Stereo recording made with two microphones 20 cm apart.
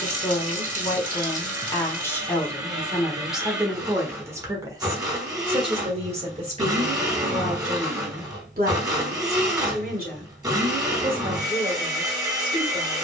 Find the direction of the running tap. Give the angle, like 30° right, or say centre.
40° right.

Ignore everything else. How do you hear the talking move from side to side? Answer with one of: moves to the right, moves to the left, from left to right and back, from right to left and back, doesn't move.
moves to the right.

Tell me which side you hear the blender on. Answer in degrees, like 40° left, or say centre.
20° right.